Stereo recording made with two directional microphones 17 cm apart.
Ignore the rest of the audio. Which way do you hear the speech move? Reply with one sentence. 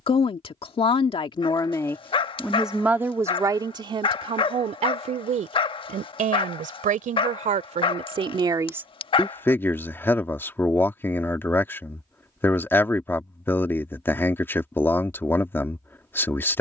In this clip you hear the speech move from left to right and back again.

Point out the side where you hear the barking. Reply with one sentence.
You can hear the barking on the left.